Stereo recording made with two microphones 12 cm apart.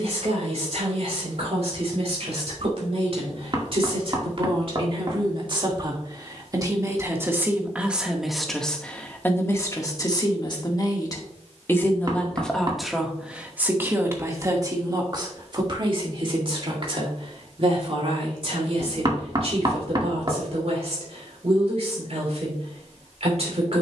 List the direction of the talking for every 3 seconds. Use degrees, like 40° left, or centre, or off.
60° right, 50° right, 10° right, 30° left, 10° right, 50° right, 60° right, 60° right.